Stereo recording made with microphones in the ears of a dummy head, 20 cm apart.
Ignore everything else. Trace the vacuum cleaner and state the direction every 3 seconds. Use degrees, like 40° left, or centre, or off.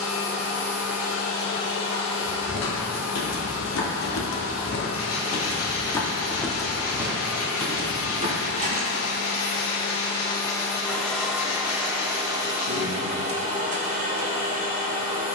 70° left, 70° left, 60° left, 10° left, 30° right.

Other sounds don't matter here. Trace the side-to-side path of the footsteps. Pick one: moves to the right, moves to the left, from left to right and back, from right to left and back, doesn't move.
moves to the right.